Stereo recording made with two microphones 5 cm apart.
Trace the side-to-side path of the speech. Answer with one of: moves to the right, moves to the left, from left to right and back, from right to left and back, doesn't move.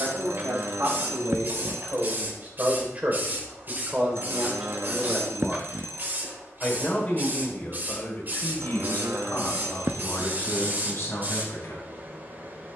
moves to the left.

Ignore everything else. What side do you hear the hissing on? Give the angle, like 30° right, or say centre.
40° right.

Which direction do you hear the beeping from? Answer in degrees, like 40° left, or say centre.
50° right.